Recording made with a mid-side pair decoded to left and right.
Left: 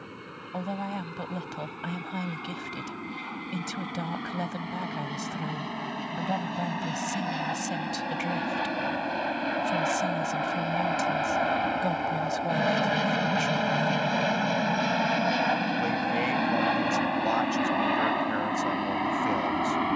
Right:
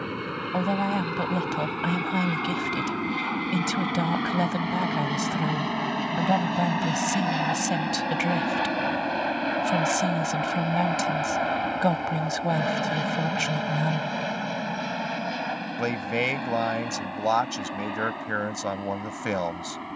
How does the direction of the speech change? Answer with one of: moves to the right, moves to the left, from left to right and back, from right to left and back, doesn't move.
doesn't move.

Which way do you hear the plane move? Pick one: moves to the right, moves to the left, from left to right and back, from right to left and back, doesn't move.
moves to the left.